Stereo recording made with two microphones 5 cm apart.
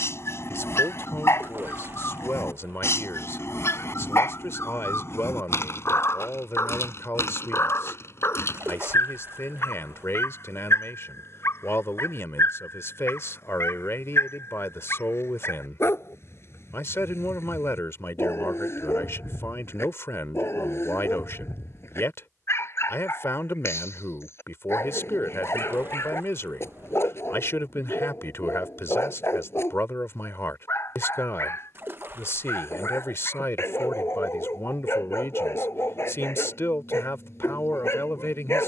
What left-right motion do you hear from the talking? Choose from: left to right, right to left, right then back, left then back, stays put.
stays put.